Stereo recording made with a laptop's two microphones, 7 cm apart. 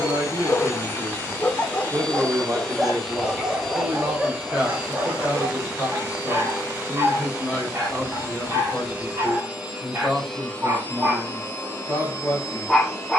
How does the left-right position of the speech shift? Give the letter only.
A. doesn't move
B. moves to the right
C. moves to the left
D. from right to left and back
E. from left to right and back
C.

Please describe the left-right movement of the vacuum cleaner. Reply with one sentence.
In this clip you hear the vacuum cleaner go right and come back.